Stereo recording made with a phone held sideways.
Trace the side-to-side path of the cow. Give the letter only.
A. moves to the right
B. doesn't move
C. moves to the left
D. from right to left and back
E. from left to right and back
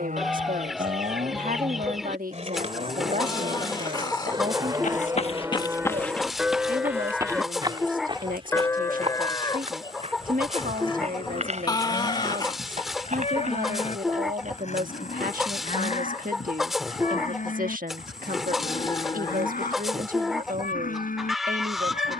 C.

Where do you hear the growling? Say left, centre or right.
left.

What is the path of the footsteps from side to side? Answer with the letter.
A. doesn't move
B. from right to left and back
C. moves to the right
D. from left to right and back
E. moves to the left
C.